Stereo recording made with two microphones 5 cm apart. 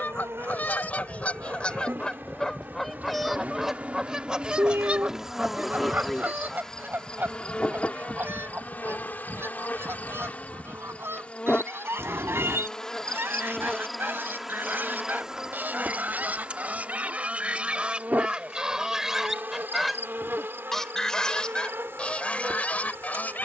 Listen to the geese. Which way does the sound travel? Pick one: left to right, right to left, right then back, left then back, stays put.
right then back.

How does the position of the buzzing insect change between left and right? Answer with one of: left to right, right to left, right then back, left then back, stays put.
left then back.